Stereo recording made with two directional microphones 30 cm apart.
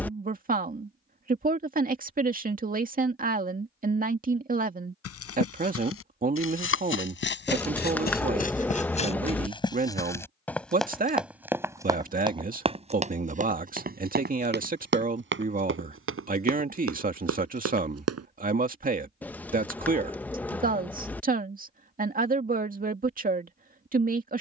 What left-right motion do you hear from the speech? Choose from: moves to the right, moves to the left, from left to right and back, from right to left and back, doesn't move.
doesn't move.